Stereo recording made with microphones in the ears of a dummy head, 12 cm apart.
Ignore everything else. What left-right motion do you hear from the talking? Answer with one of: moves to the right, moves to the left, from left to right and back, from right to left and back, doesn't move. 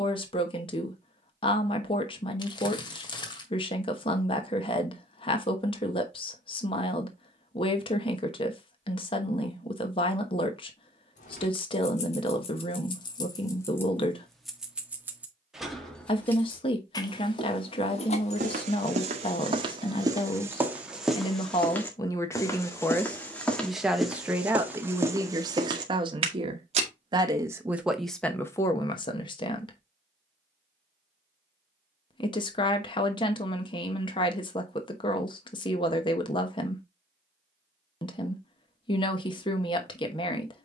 from left to right and back.